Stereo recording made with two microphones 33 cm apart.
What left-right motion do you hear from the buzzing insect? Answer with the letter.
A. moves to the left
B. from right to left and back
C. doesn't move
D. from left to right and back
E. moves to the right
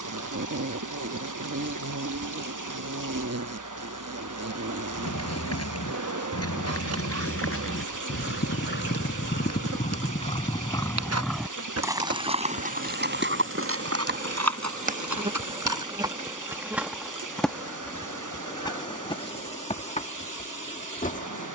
A.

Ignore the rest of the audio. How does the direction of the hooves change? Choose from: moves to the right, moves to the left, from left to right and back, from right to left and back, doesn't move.
moves to the right.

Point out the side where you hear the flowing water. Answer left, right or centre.
right.